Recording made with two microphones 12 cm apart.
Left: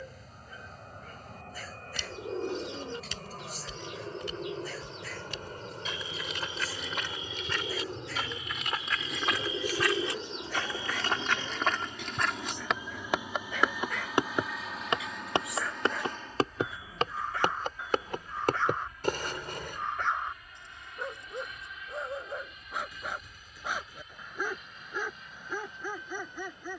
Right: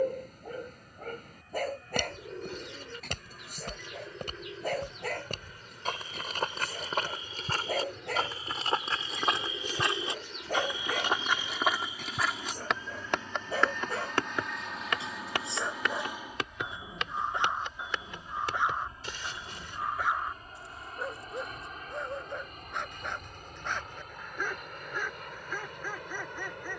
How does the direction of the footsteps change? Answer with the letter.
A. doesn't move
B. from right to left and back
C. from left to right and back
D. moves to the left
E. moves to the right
D.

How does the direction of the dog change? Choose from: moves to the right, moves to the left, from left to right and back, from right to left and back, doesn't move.
moves to the left.